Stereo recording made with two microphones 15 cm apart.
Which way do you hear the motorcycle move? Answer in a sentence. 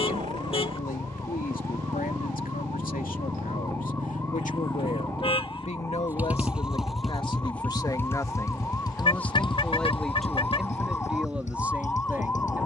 You can hear the motorcycle go from the right side to the left.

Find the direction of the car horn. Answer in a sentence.
In this clip you hear the car horn on the left.